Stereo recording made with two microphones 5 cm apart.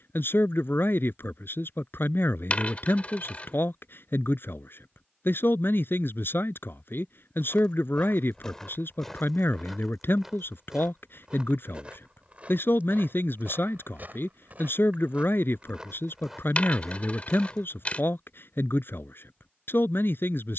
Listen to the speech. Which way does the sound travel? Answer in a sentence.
In this clip you hear the speech stay put.